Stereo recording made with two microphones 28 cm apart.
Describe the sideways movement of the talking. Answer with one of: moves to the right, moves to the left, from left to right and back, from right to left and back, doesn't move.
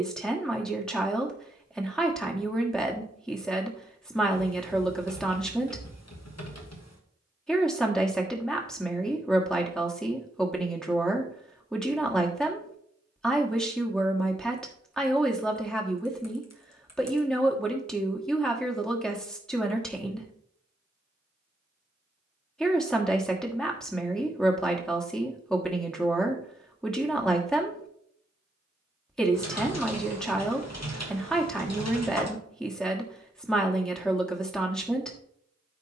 doesn't move.